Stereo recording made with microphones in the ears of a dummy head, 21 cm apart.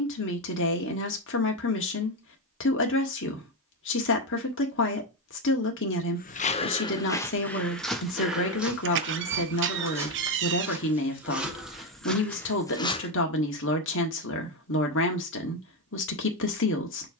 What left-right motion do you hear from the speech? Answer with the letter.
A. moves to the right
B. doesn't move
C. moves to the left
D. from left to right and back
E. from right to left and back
B.